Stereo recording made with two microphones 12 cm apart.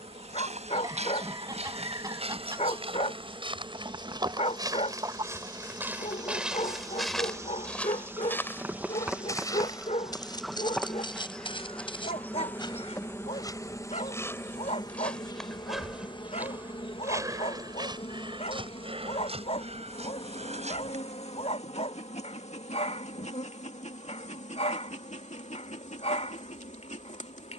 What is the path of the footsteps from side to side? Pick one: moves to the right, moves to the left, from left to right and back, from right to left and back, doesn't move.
from right to left and back.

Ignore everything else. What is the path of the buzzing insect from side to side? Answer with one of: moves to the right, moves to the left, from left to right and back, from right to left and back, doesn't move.
moves to the left.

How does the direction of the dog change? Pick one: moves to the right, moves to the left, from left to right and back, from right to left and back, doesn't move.
doesn't move.